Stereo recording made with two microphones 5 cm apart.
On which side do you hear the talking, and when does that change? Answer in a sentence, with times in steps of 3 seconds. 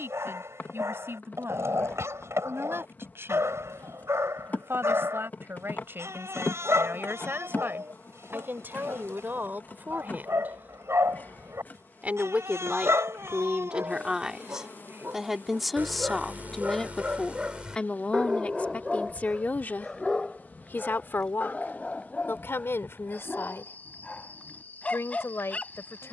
You can hear the talking on the right from 0 s, in the centre from 15 s and on the left from 18 s.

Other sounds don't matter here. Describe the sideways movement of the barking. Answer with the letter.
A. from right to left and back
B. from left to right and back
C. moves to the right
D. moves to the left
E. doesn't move
D.